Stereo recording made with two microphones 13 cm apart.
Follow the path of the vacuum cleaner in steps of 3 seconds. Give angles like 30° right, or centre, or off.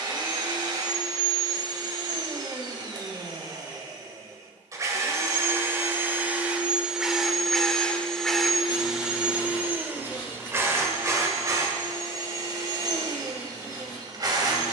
30° right, 30° right, centre, 20° right, 30° right.